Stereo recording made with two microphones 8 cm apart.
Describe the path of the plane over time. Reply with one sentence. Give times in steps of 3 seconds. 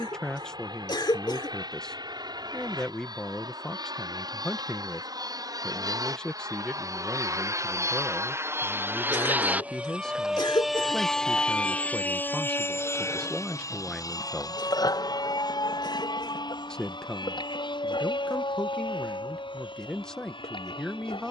You can hear the plane on the right from 0 s, in the centre from 9 s and on the left from 12 s.